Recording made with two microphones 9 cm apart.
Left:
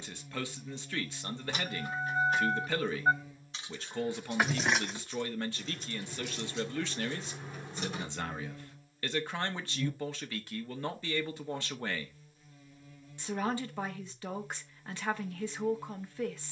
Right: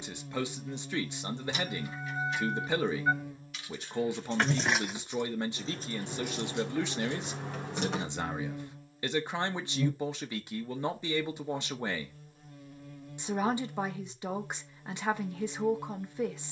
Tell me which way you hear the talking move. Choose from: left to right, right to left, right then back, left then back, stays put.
stays put.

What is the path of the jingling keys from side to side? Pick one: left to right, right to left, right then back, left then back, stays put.
left to right.